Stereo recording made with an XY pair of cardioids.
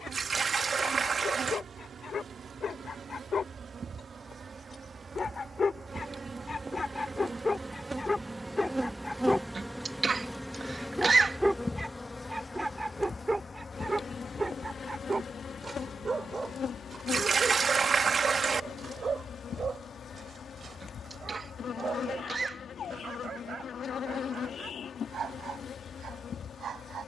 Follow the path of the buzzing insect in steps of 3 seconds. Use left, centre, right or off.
right, right, right, centre, left, left, left, left, left.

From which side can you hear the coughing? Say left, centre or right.
right.